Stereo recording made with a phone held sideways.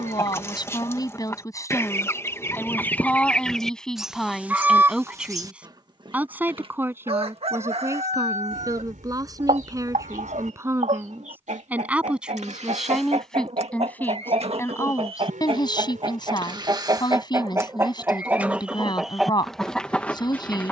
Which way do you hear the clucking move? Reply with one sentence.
In this clip you hear the clucking go right and come back.